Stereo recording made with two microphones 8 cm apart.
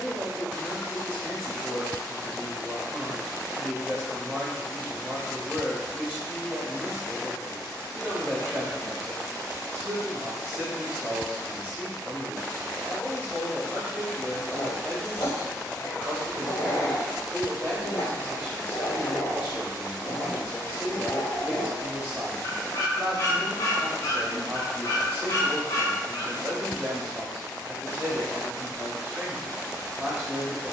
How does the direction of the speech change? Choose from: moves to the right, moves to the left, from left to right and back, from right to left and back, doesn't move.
doesn't move.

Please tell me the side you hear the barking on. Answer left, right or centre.
left.